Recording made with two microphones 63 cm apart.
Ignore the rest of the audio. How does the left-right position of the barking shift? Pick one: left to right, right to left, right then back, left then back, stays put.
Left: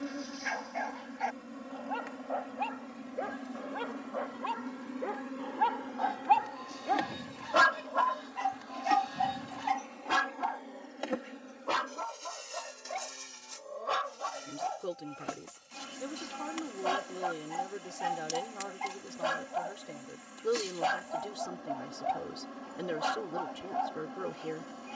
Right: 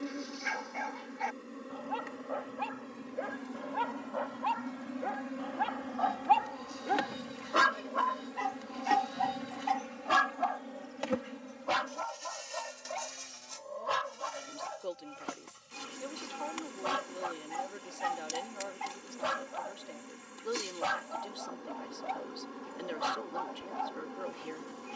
left then back.